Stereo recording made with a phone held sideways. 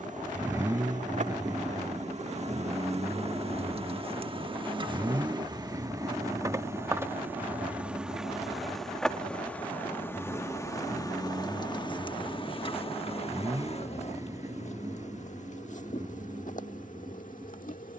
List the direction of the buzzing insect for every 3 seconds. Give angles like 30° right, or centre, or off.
50° right, 30° right, 10° right, 20° left, 40° left, 60° left.